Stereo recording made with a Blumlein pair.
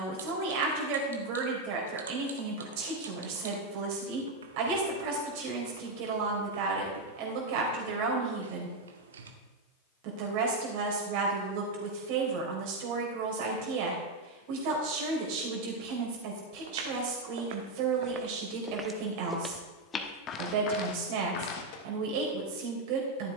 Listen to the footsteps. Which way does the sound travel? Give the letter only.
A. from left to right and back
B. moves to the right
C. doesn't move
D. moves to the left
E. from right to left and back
D.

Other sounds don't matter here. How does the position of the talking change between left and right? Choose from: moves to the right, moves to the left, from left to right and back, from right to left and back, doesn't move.
doesn't move.